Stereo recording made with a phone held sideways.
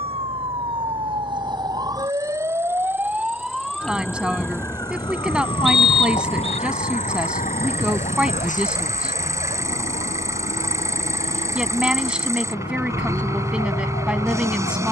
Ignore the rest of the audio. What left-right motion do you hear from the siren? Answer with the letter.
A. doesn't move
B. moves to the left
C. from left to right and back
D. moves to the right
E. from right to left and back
B.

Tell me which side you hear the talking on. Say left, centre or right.
centre.